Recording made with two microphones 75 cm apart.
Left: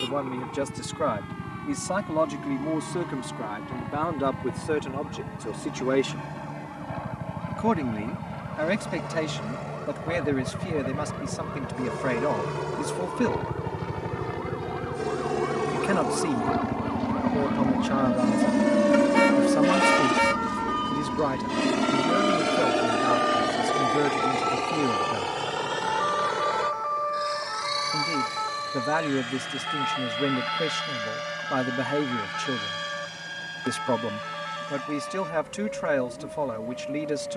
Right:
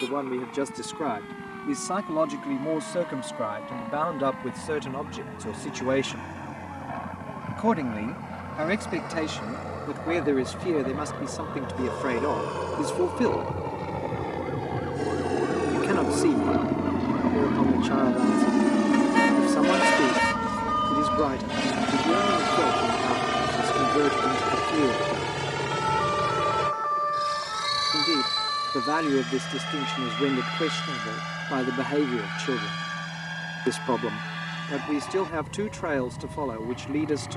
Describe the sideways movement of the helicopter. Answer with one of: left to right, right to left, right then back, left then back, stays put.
left to right.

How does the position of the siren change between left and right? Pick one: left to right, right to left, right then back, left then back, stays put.
right to left.